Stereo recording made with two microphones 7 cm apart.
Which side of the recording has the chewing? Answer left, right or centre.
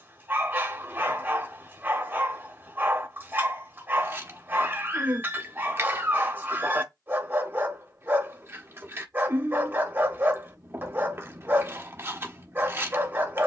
right.